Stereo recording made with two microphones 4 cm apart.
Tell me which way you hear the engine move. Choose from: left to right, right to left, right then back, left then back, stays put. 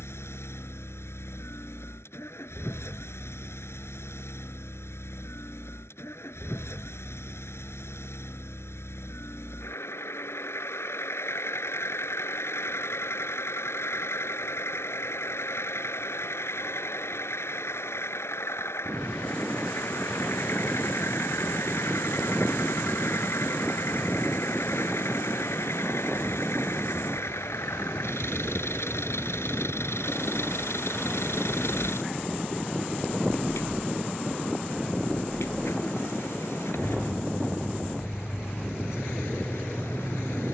stays put.